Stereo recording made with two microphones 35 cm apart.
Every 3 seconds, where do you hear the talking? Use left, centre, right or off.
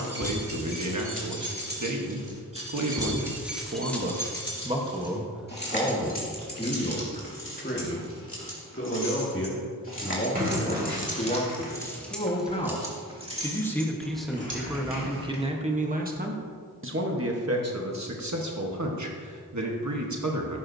right, right, left, left, centre, right, right.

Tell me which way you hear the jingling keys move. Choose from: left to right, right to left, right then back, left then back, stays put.
left then back.